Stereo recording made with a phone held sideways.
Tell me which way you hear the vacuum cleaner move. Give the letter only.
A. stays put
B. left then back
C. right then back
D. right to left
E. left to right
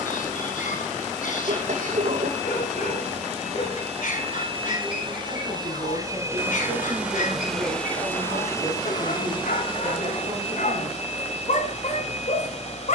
D.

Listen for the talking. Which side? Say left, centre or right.
right.